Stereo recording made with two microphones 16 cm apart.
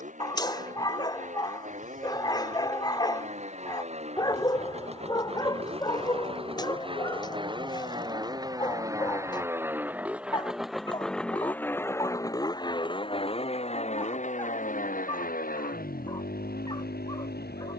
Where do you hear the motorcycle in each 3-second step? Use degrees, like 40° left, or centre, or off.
50° right, 40° right, 30° right, centre, 40° left, 70° left.